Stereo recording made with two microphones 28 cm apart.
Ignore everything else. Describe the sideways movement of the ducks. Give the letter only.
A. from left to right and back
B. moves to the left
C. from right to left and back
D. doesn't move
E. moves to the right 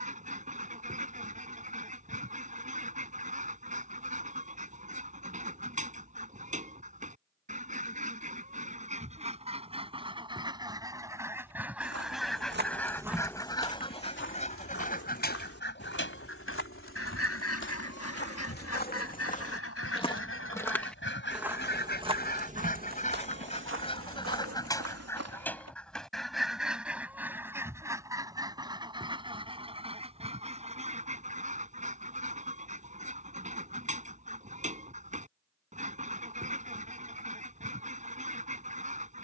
C.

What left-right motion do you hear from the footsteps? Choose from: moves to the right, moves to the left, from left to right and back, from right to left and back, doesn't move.
from right to left and back.